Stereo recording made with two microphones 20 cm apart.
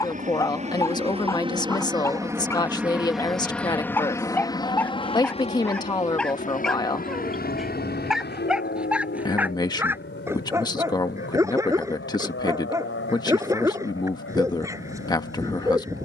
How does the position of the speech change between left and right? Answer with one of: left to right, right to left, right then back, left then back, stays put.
stays put.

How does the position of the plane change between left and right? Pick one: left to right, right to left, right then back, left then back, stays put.
right to left.